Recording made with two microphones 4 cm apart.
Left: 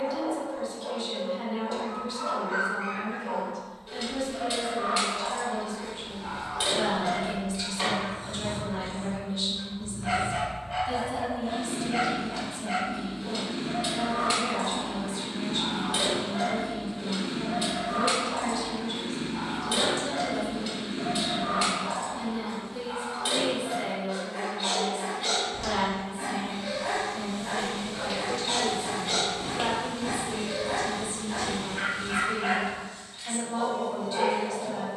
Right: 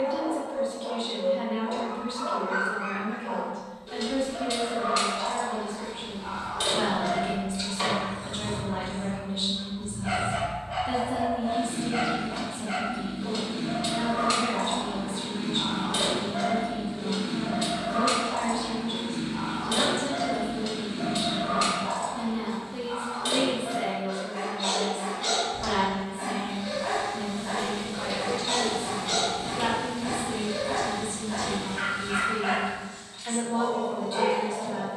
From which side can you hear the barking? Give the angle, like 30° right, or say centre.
10° left.